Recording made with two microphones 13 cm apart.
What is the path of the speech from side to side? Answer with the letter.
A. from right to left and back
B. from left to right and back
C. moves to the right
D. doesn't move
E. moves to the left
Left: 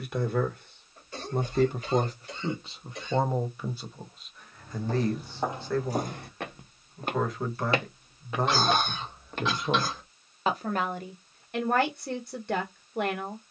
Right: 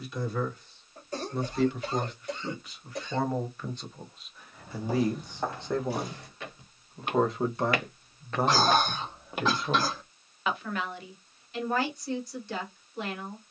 B.